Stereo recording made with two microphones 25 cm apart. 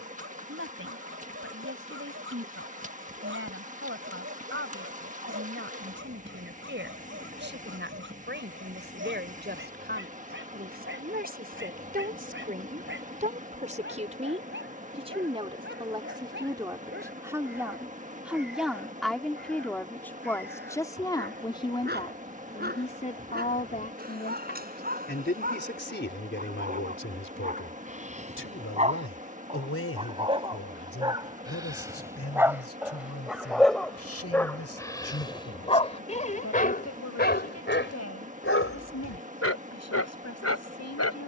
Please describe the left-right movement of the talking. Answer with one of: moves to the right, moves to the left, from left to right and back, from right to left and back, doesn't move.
moves to the left.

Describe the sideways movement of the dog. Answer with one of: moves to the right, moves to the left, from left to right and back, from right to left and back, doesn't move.
moves to the left.